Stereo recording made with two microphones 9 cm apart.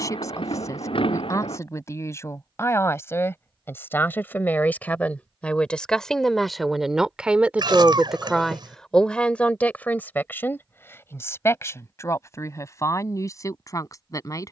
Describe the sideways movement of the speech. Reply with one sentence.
In this clip you hear the speech go right and come back.